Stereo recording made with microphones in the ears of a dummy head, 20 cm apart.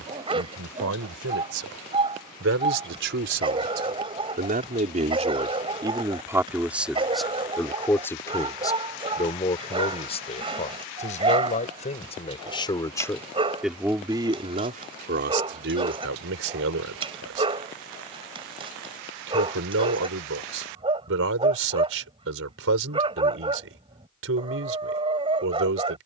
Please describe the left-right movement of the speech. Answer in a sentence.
You can hear the speech move from right to left and back again.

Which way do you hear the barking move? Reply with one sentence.
You can hear the barking stay put.